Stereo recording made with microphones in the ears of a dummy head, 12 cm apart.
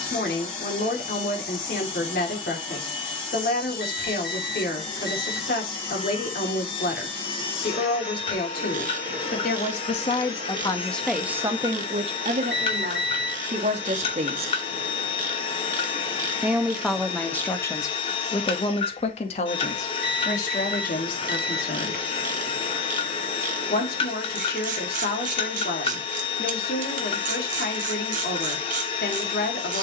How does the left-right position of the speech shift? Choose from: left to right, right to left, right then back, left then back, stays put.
right then back.